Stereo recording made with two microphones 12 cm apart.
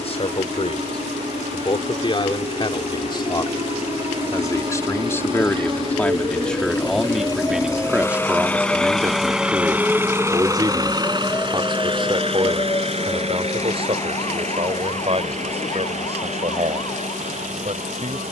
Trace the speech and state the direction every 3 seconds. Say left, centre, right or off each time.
left, left, centre, right, right, right.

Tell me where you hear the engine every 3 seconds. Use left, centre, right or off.
left, left, left, right, right, right.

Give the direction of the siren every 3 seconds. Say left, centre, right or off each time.
right, right, right, centre, left, left.